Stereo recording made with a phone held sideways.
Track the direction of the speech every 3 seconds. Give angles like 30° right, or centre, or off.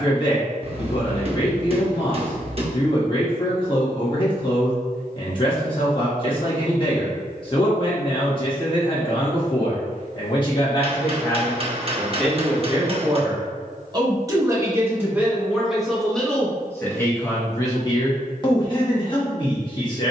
30° left, 30° left, 30° left, 30° left, 20° right, 10° left, 30° left.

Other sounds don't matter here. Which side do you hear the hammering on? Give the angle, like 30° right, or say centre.
40° right.